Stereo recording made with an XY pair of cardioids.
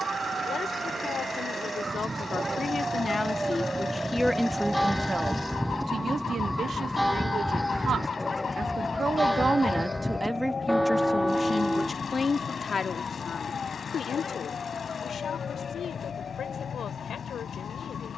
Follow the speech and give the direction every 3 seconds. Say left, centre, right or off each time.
left, centre, right, centre, left, left.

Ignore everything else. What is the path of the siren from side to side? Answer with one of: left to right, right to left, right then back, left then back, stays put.
right to left.